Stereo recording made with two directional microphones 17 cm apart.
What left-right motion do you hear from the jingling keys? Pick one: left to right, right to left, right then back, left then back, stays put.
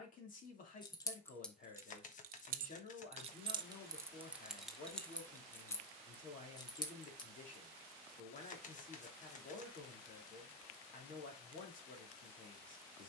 right then back.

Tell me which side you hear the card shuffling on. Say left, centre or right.
left.